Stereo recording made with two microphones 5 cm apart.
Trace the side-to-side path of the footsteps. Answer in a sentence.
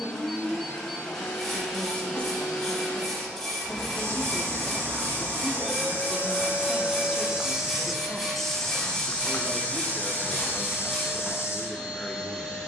You can hear the footsteps go from the right side to the left.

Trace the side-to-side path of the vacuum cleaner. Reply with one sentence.
You can hear the vacuum cleaner stay put.